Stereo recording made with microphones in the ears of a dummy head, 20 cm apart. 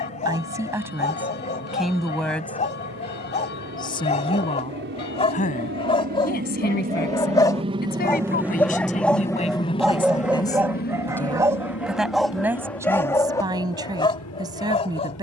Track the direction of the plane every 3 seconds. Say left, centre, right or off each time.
right, right, right, left, left.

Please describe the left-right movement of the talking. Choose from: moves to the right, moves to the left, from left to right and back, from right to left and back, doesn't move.
from right to left and back.